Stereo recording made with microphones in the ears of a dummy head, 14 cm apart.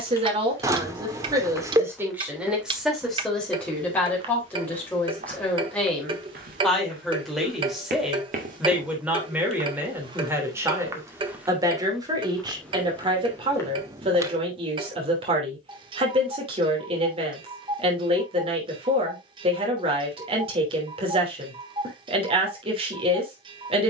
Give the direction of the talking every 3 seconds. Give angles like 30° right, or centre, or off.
20° right, 10° left, centre, 20° right, 30° right, 40° right, 40° right, 40° right.